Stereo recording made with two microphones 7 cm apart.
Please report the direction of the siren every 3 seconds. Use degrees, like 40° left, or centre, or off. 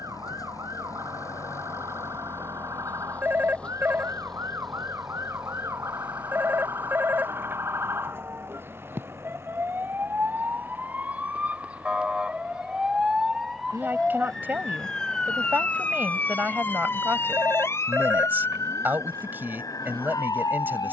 50° right, 40° right, 40° right, 20° right, centre, 30° left, 50° left.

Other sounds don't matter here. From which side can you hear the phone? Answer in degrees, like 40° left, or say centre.
30° right.